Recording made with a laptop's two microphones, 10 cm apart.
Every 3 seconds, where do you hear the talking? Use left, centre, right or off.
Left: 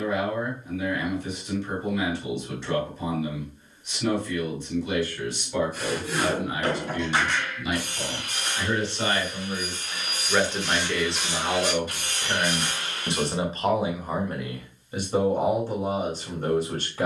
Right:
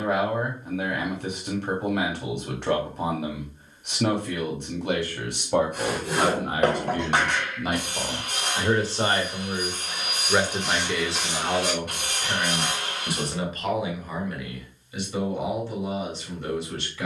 right, right, right, centre, left, left.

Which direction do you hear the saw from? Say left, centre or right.
right.